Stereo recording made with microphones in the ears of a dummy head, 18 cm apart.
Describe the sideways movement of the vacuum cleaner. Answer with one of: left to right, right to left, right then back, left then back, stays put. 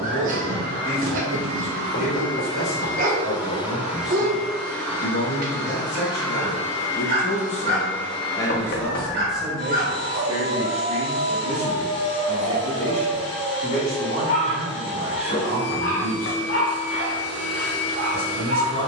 right to left.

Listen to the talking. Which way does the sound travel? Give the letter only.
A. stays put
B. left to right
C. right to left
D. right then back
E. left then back
B.